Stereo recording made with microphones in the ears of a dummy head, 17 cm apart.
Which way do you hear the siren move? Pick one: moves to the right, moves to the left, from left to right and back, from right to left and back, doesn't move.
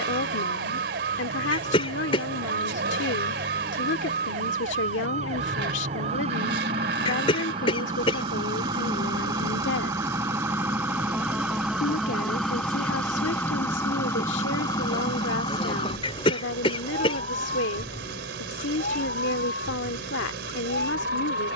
moves to the left.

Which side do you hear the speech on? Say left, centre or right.
left.